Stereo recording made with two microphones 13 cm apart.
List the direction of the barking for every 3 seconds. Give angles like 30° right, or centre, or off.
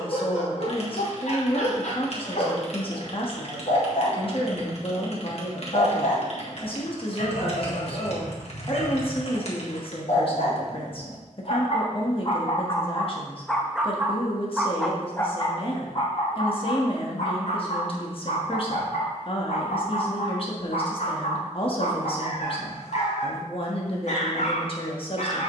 70° left, 70° left, 70° left, 70° left, 10° left, 50° left, 70° left, 70° left, 70° left.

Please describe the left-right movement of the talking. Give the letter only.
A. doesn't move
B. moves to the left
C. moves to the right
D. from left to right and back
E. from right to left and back
A.